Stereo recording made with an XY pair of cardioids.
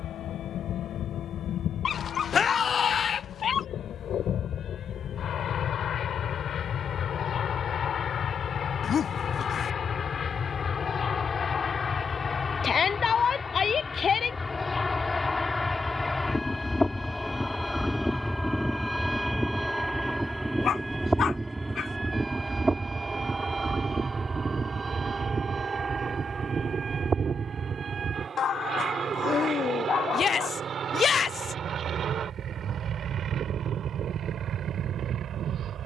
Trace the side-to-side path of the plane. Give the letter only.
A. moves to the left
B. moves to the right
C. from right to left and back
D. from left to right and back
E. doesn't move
B.